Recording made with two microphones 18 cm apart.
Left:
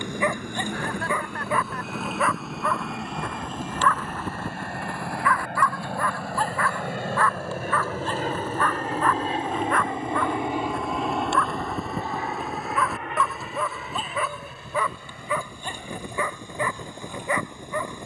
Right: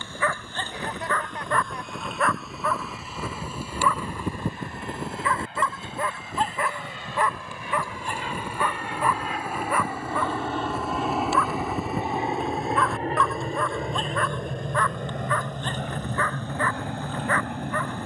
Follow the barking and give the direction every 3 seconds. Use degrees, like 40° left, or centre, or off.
10° left, 20° right, 20° right, 10° right, centre, 10° left.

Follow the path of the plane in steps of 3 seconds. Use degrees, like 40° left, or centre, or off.
80° left, 70° left, 50° left, 10° left, 30° right, 60° right.